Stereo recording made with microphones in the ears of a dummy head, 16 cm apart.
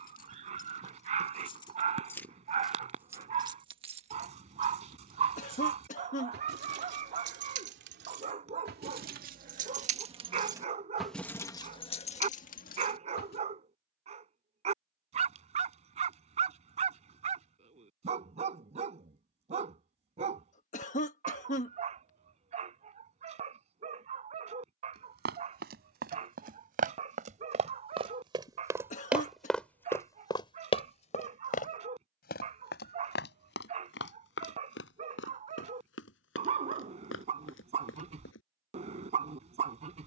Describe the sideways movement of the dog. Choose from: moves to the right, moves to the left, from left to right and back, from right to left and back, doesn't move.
doesn't move.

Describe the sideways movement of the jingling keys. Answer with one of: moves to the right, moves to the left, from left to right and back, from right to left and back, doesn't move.
from left to right and back.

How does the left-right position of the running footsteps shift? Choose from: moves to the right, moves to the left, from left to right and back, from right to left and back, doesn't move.
moves to the left.